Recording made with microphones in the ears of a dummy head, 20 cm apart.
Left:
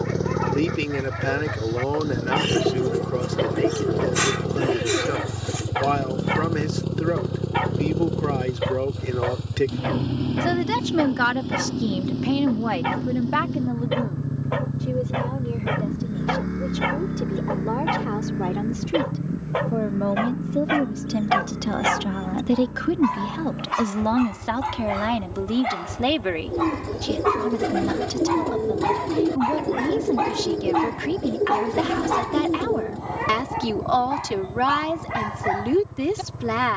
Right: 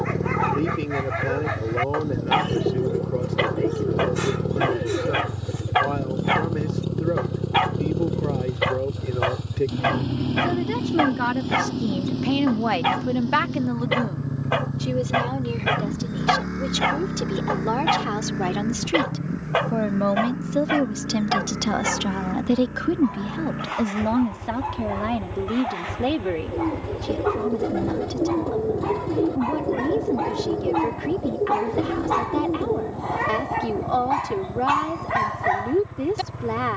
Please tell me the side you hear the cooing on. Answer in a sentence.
In this clip you hear the cooing on the left.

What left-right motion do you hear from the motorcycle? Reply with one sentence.
You can hear the motorcycle travel towards the right.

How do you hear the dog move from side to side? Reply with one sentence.
In this clip you hear the dog go left and come back.